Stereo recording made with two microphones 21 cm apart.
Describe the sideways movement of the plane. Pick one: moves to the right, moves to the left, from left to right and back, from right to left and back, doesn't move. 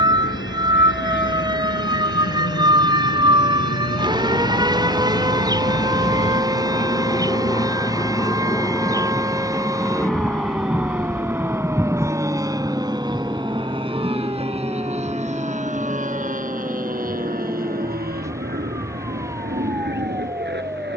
moves to the right.